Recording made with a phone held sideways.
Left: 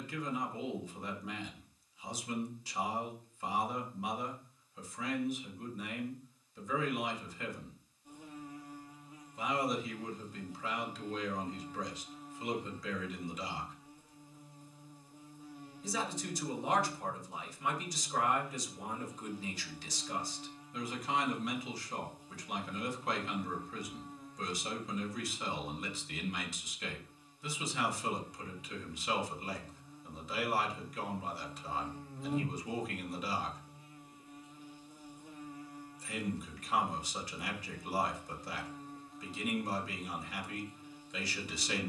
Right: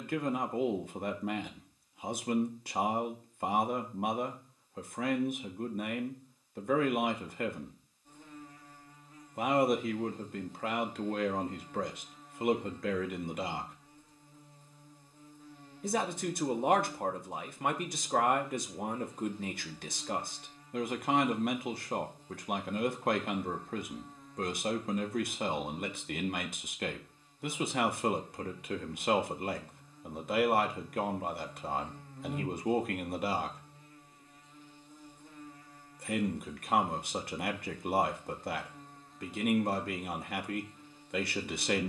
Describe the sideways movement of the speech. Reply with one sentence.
In this clip you hear the speech stay in one place.